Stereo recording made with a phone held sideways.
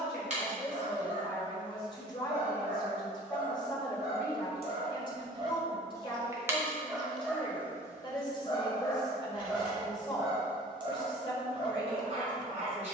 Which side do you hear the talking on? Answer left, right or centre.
left.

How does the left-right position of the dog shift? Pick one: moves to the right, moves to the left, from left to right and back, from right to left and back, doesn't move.
from right to left and back.